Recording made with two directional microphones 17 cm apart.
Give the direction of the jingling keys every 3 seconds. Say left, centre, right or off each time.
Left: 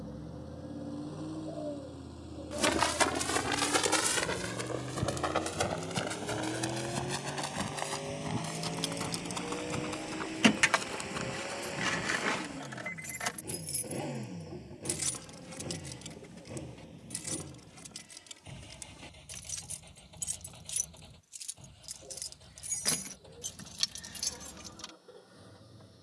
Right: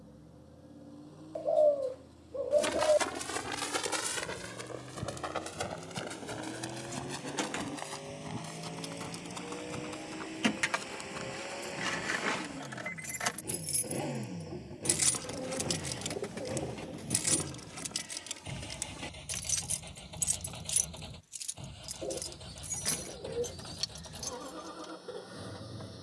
off, off, left, left, centre, right, right, centre, left.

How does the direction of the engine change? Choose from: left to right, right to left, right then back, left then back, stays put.
left to right.